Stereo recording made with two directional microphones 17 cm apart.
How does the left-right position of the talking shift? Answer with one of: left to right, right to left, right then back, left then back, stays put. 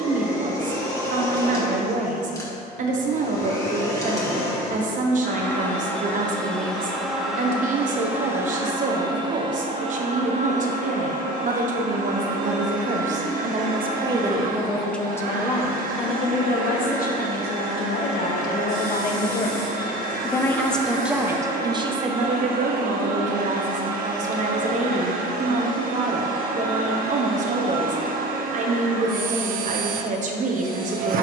left then back.